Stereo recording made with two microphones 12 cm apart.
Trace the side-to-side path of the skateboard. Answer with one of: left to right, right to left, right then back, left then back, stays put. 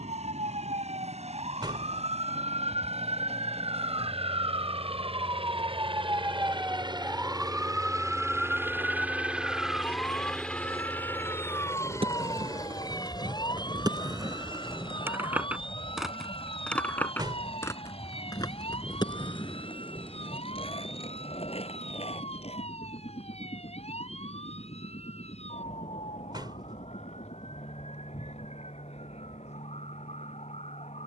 right to left.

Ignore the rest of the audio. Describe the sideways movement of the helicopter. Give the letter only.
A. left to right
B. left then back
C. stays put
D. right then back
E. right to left
E.